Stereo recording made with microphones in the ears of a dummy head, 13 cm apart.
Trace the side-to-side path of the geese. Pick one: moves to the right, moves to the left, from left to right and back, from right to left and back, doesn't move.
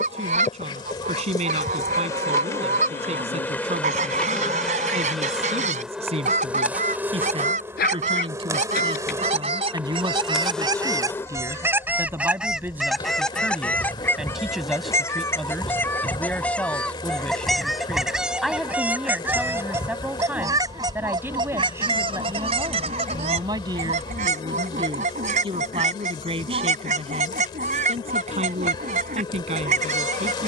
from right to left and back.